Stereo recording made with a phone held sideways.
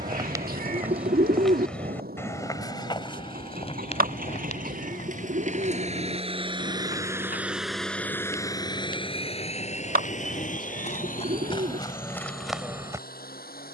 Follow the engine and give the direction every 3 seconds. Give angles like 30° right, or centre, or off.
70° right, 60° right, 10° right, 50° left, 70° left.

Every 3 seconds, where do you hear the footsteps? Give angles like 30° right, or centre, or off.
centre, 50° left, 60° left, 50° left, centre.